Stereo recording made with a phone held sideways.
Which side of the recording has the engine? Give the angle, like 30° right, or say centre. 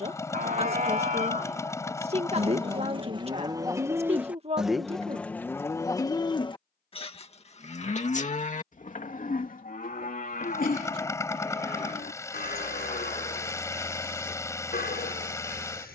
20° left.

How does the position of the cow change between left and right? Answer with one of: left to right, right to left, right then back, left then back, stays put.
right to left.